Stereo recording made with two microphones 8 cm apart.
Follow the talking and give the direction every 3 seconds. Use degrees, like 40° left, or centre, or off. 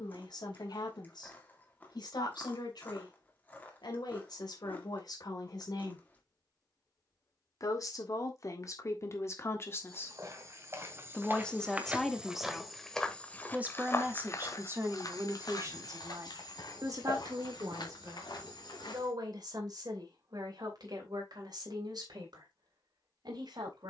70° left, 60° left, 50° left, 20° left, 20° right, 50° right, 60° right, 70° right.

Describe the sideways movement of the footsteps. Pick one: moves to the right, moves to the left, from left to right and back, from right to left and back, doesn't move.
moves to the left.